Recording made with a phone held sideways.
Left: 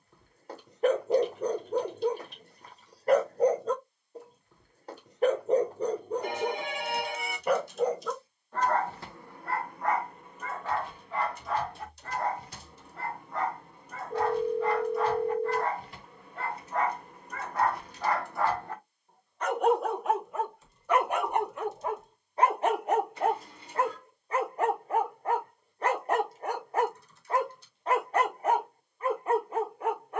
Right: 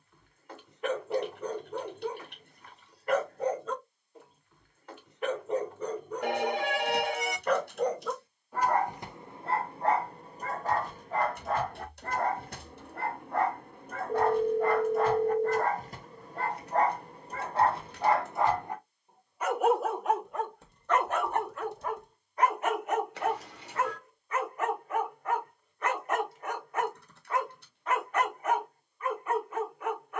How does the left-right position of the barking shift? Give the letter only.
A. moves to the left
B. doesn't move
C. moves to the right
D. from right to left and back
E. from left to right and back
E.